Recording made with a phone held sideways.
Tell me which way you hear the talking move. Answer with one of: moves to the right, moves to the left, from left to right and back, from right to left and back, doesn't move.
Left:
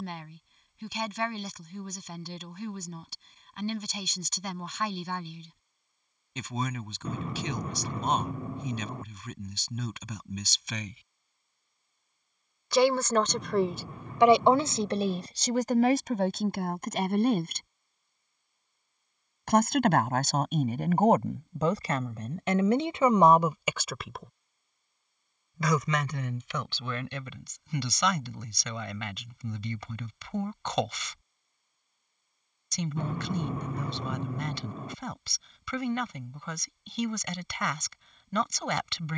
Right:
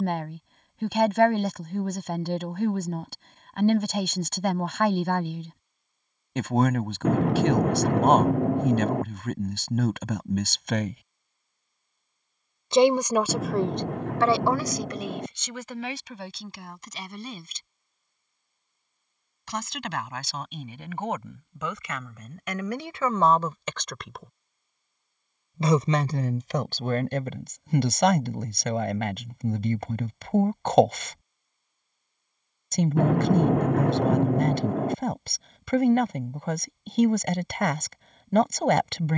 from right to left and back.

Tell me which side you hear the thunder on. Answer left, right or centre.
right.